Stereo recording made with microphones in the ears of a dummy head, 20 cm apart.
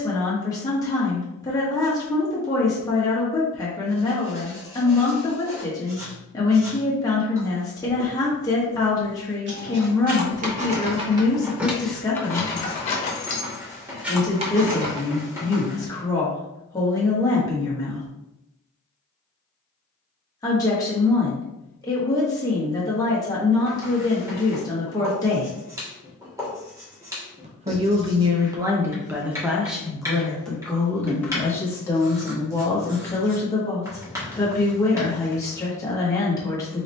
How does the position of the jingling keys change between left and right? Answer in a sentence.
In this clip you hear the jingling keys go left and come back.